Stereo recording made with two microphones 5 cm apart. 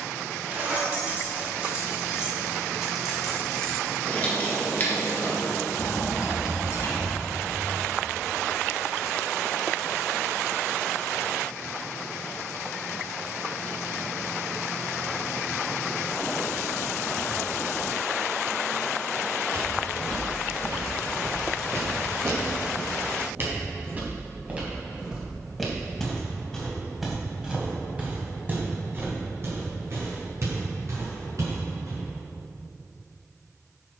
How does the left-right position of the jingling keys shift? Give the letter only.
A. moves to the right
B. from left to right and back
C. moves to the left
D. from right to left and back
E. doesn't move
C.